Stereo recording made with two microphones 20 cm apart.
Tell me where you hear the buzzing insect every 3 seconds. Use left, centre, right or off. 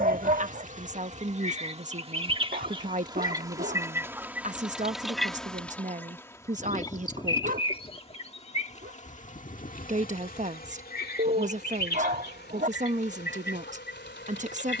right, centre, left, left, left.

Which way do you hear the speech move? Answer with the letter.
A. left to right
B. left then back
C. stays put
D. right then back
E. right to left
C.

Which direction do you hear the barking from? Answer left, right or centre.
right.